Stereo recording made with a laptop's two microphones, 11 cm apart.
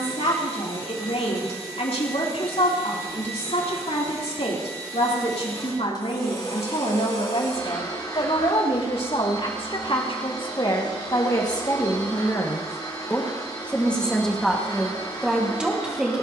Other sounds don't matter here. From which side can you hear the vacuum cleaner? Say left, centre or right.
left.